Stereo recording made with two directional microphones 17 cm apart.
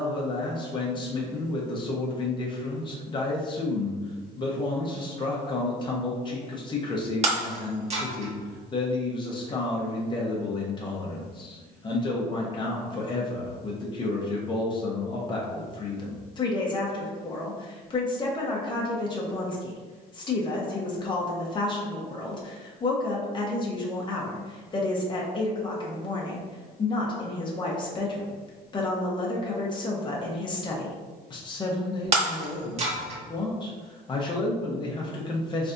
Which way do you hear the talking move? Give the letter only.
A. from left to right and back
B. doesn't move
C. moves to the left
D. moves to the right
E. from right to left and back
B.